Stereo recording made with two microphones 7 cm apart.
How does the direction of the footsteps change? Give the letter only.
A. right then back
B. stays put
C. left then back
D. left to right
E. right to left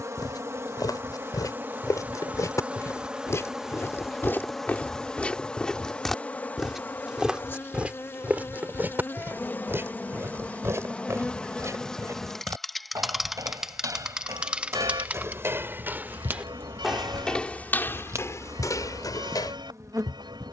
A.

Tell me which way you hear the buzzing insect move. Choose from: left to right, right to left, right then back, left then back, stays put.
left then back.